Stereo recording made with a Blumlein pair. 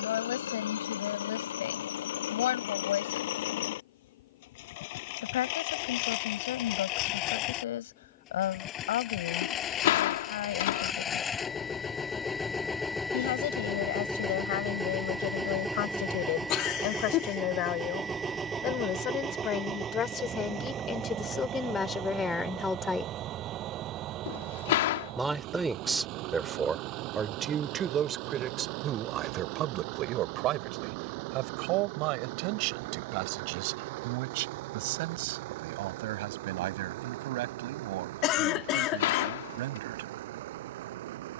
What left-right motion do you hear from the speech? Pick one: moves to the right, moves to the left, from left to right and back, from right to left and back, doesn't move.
moves to the right.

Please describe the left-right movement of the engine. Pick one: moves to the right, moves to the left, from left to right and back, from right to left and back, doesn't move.
moves to the right.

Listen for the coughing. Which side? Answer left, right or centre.
left.